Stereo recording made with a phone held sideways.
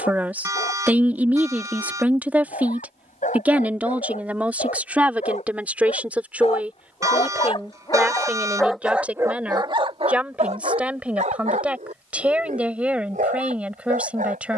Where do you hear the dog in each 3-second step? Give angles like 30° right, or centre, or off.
80° left, 70° left, 30° left, 50° right, 80° right.